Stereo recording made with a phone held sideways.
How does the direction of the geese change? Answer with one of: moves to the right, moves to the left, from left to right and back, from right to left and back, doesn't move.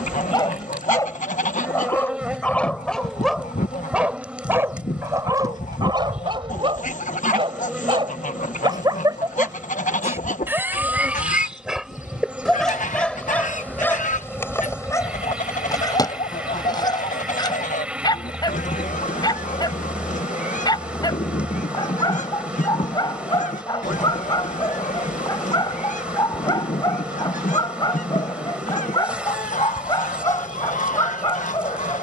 doesn't move.